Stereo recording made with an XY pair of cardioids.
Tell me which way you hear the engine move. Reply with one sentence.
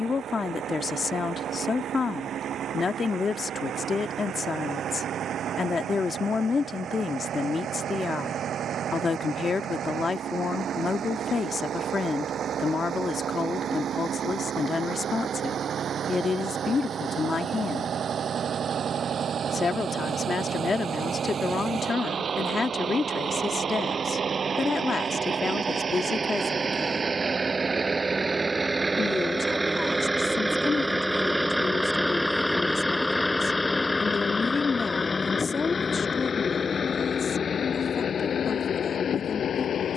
You can hear the engine travel towards the left.